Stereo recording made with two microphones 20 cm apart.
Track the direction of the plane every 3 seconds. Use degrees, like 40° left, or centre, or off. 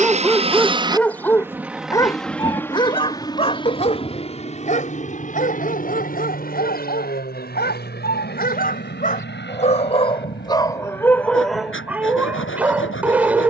10° right, 30° left, 40° left, 50° left, 60° left.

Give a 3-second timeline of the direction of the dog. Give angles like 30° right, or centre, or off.
10° left, 40° left, 50° left, 20° left, 10° right.